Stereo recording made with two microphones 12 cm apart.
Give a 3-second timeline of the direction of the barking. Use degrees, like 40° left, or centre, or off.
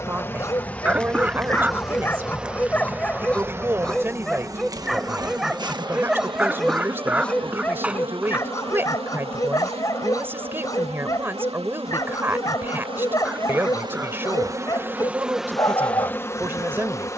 20° left, centre, 10° left, 30° left, 30° left, 30° left.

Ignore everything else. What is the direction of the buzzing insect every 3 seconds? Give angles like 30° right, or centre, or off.
centre, 30° right, 50° right, 60° right, 40° right, 10° left.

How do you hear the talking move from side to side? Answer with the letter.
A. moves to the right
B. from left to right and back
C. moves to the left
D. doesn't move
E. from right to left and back
D.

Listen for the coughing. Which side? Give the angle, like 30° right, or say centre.
10° right.